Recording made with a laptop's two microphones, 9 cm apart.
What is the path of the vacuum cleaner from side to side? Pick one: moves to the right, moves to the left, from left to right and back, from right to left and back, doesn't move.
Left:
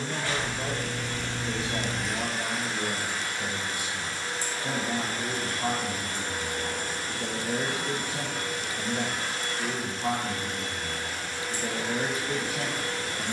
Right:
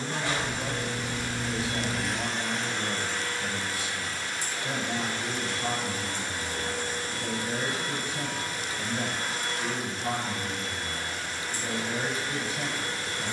moves to the left.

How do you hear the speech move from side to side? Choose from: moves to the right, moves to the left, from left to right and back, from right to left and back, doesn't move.
doesn't move.